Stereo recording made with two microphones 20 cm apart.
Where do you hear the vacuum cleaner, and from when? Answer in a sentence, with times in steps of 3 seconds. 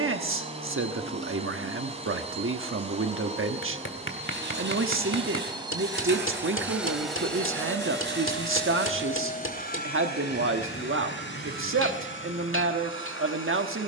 In this clip you hear the vacuum cleaner on the right from 0 s, in the centre from 6 s and on the left from 9 s.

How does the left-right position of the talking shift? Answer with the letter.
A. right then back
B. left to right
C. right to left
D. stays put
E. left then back
D.